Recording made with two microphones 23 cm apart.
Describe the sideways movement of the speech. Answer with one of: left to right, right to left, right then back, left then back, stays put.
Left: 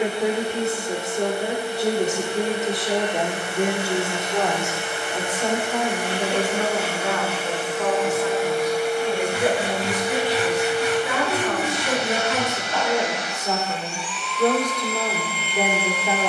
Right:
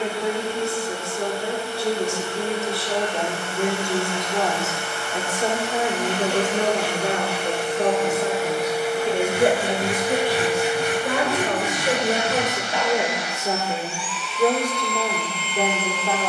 right then back.